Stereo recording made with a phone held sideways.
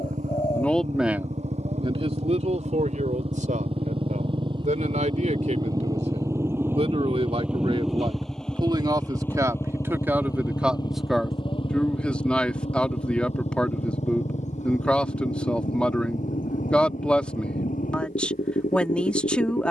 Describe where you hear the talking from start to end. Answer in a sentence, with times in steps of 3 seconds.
You can hear the talking on the right from 0 s and in the centre from 9 s.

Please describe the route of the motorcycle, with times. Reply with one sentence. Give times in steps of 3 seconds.
In this clip you hear the motorcycle on the right from 0 s, in the centre from 6 s and on the left from 9 s.